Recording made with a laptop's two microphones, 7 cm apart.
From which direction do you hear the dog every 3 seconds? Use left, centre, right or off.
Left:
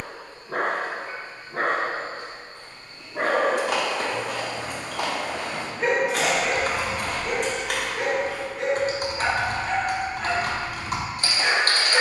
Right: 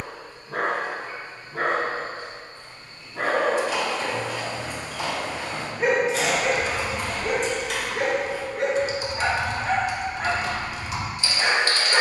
left, centre, right, right.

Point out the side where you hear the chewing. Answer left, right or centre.
left.